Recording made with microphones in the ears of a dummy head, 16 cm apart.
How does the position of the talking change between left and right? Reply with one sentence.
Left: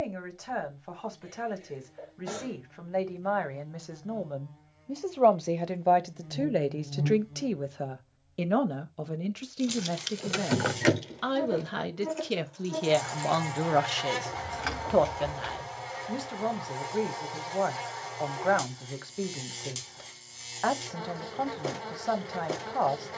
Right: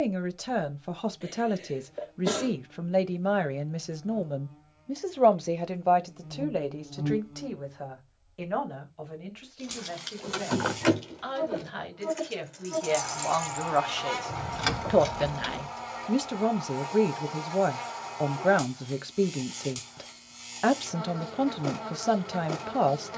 You can hear the talking move from right to left and back again.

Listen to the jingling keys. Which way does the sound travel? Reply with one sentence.
You can hear the jingling keys go from the left side to the right.